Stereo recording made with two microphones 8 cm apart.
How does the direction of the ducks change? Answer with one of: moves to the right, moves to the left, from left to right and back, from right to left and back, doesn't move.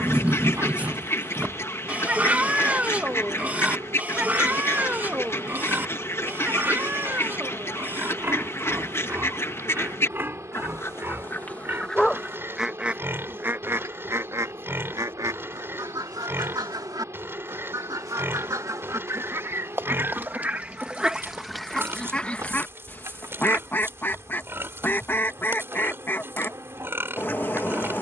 from left to right and back.